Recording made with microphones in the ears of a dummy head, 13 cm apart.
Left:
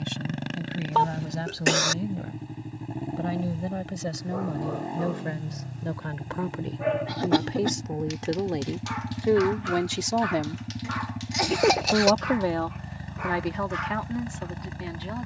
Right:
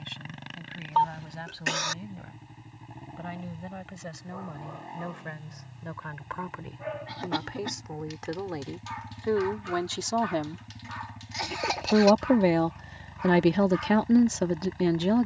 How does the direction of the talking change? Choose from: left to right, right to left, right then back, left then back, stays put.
left to right.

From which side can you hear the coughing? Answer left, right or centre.
left.